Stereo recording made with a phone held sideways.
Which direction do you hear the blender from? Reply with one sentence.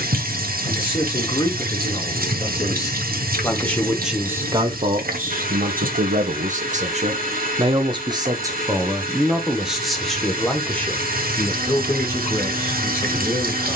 You can hear the blender on the right.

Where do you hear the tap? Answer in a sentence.
In this clip you hear the tap on the right.